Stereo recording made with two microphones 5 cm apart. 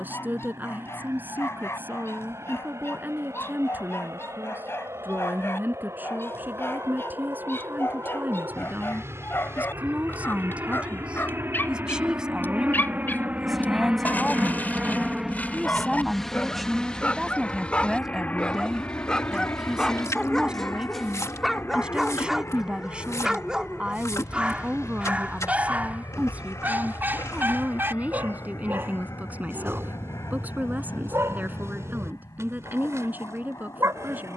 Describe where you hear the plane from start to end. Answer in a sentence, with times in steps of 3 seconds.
In this clip you hear the plane on the right from 0 s, in the centre from 15 s and on the left from 18 s.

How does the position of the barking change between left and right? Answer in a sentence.
You can hear the barking travel towards the right.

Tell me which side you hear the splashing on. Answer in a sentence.
You can hear the splashing on the left.